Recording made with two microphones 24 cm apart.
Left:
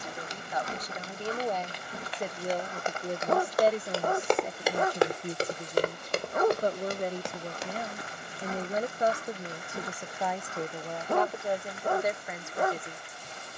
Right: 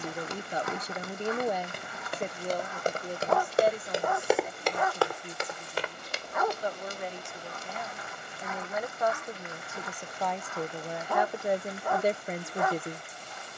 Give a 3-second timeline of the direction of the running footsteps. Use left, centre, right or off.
right, centre, left, off, off.